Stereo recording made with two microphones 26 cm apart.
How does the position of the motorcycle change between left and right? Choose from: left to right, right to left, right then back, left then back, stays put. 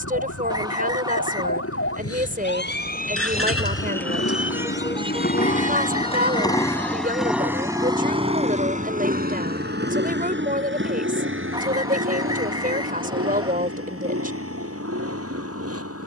left to right.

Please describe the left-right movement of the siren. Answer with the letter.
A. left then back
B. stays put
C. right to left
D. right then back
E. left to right
E.